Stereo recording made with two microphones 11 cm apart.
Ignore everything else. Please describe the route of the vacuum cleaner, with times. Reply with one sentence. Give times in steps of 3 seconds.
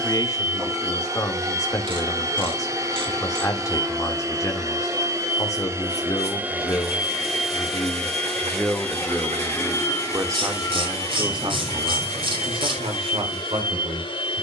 In this clip you hear the vacuum cleaner on the right from 0 s, in the centre from 6 s and on the left from 9 s.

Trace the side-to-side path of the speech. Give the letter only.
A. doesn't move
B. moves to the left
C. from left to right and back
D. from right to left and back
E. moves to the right
E.